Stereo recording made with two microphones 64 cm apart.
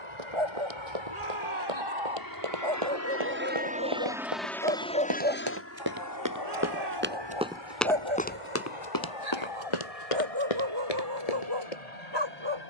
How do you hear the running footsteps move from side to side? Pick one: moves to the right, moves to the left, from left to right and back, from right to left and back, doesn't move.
moves to the left.